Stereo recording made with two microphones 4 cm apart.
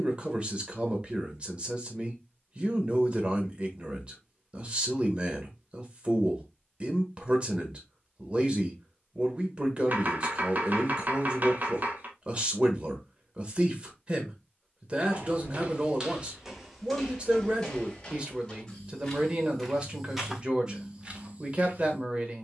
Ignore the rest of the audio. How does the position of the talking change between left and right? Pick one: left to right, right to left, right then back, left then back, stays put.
stays put.